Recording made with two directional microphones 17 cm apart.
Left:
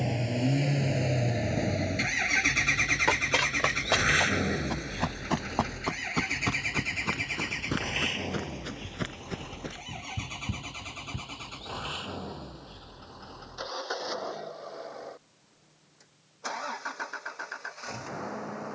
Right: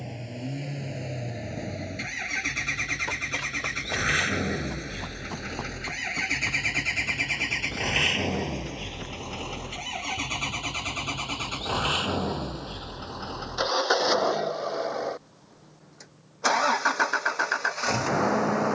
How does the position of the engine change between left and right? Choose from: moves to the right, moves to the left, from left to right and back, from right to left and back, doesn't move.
moves to the right.